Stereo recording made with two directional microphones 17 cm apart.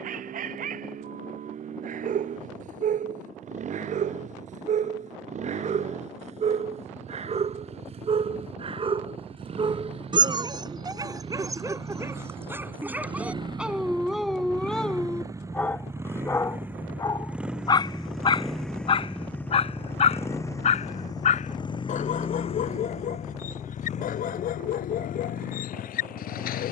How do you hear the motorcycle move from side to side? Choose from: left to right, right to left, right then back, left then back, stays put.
right to left.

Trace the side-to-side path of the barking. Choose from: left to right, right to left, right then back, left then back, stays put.
right to left.